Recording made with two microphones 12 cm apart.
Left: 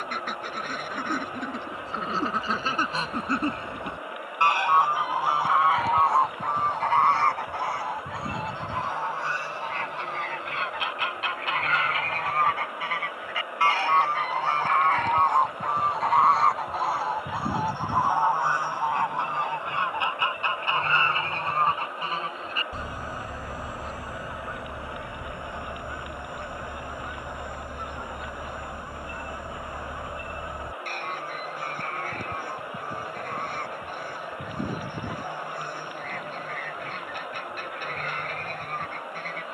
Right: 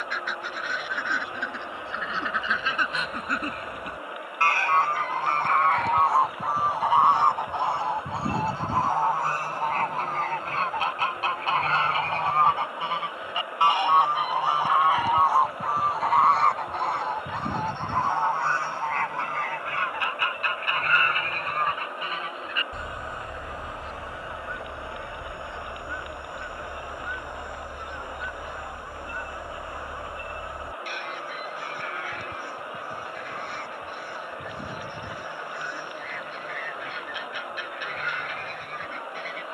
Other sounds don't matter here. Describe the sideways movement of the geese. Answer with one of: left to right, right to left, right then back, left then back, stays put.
right then back.